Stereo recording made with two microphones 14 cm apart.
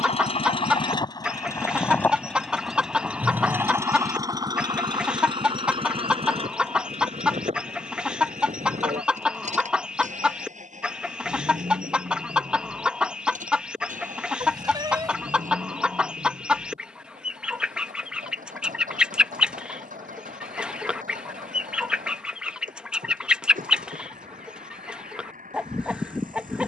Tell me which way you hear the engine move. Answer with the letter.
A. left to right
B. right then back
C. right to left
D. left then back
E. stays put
A.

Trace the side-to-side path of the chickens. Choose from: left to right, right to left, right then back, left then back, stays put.
stays put.